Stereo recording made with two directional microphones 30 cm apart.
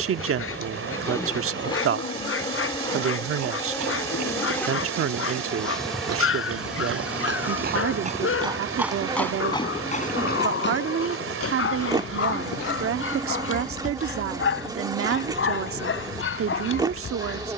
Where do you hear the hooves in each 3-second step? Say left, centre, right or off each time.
off, right, right, left, left, off.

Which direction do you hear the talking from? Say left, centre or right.
right.